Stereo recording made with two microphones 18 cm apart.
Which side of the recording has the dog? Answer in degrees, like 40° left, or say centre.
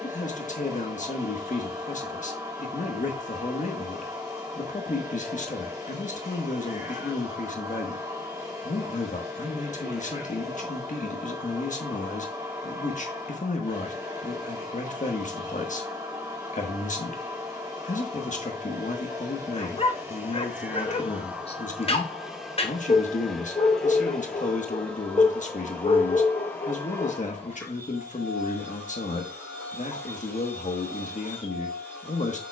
30° left.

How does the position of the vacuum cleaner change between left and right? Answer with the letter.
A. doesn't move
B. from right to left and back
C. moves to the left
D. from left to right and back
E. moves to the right
C.